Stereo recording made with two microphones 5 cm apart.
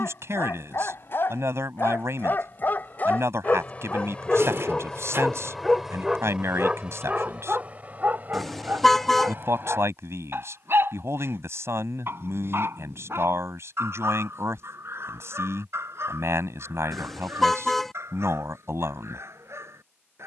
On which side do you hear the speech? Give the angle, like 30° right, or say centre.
80° right.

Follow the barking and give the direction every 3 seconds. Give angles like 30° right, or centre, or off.
50° left, 20° left, 30° right, 60° right, 70° right, 70° right, 80° right.